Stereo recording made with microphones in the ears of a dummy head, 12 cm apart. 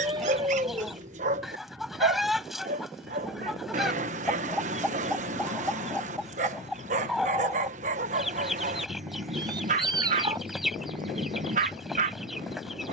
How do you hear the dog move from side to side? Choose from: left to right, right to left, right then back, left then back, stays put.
stays put.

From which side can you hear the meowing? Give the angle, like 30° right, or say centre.
30° right.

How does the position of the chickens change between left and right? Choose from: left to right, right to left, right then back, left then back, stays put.
stays put.